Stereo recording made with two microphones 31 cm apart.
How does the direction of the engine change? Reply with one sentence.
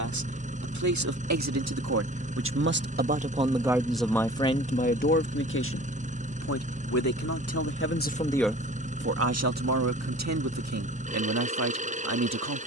In this clip you hear the engine stay in one place.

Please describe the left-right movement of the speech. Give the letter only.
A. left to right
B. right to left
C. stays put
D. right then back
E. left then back
E.